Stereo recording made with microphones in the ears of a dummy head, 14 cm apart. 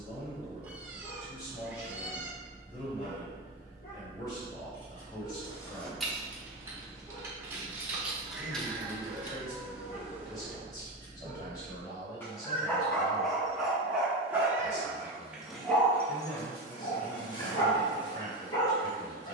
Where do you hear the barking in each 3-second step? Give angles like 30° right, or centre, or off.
30° left, 30° left, 30° left, 30° left, centre, 20° left, 30° left.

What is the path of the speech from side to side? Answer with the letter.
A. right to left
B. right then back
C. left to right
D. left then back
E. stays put
E.